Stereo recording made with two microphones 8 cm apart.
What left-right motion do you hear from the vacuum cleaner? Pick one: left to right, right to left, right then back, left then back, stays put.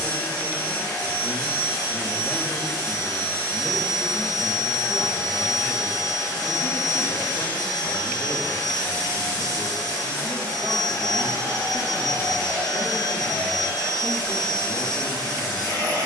stays put.